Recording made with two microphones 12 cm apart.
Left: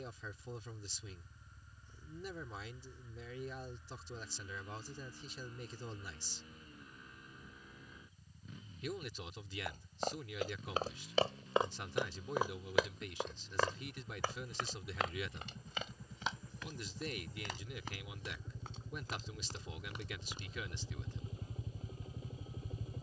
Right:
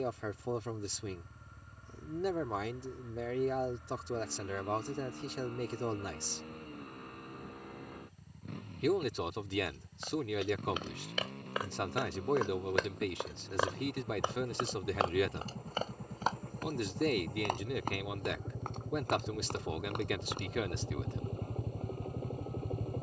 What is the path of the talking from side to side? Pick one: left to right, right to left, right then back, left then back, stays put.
stays put.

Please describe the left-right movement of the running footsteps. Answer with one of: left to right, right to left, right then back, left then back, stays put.
left to right.